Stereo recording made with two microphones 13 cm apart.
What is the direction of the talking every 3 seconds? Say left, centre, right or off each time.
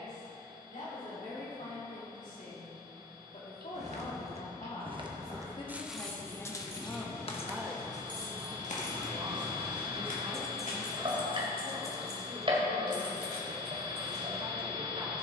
left, left, centre, right, right.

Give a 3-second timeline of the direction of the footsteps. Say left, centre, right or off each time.
off, right, left, left, off.